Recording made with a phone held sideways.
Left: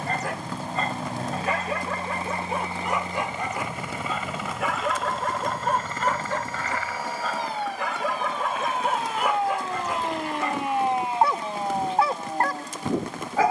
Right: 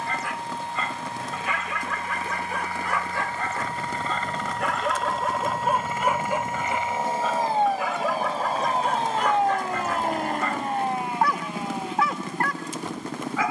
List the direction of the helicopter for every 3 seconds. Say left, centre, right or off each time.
left, centre, right, right, right.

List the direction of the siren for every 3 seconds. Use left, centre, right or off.
right, right, right, centre, left.